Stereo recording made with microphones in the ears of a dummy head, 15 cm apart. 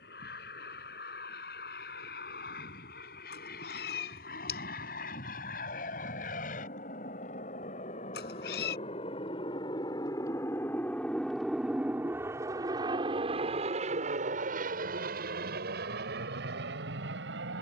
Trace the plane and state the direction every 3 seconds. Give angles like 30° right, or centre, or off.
70° left, 60° left, 50° left, 10° left, 30° right, 60° right.